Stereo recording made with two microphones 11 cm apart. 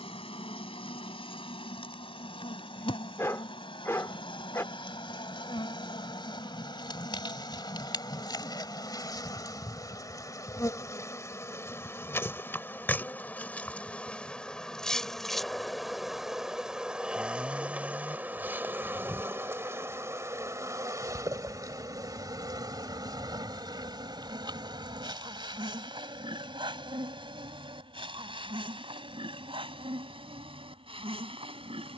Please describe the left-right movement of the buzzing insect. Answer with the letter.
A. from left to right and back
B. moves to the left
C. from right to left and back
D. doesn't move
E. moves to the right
E.